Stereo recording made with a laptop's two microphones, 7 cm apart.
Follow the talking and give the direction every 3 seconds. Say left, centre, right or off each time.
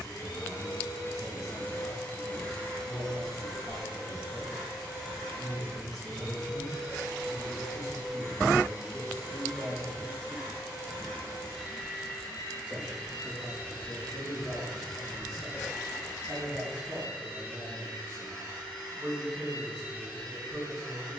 left, left, left, left, right, right, right.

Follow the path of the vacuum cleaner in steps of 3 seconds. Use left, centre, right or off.
left, centre, centre, centre, centre, centre, centre.